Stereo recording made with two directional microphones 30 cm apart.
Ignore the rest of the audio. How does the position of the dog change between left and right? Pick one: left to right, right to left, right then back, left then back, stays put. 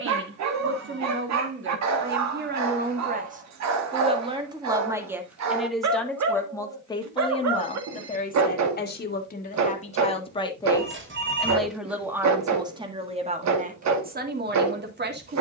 stays put.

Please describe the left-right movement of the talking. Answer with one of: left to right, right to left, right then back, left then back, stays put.
left then back.